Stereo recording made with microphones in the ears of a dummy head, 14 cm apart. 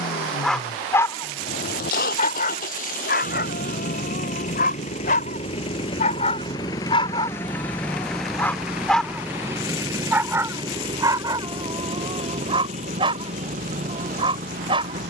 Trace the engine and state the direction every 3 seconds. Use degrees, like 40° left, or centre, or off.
70° left, 50° left, 10° left, 30° right, 50° right.